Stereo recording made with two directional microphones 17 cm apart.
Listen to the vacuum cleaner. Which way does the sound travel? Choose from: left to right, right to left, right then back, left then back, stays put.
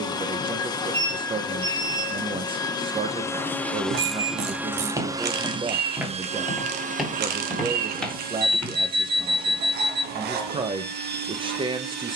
left to right.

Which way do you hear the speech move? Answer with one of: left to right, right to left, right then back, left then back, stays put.
stays put.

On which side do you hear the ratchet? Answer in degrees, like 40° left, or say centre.
70° right.